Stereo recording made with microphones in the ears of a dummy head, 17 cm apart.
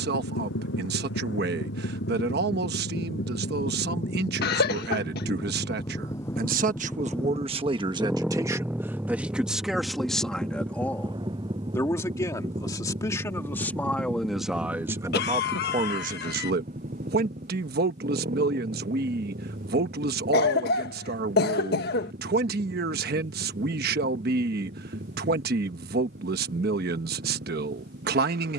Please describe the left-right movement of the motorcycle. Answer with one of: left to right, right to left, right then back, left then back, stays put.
left to right.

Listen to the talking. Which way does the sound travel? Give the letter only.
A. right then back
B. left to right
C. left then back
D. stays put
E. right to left
C.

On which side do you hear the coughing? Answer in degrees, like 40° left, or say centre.
50° left.